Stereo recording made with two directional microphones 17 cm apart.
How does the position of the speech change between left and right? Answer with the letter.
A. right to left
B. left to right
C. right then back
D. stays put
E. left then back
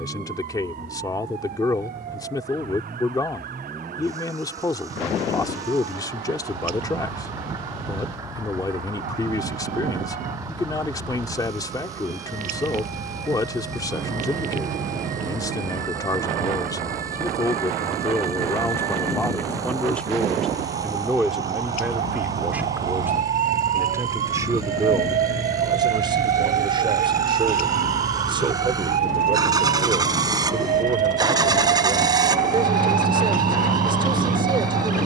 B.